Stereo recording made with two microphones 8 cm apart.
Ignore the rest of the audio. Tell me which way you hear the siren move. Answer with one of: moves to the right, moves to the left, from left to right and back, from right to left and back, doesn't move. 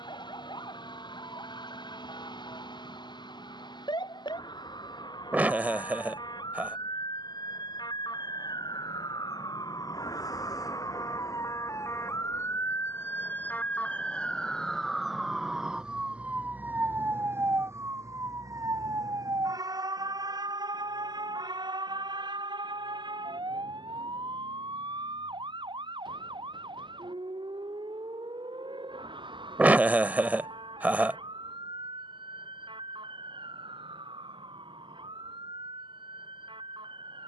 moves to the right.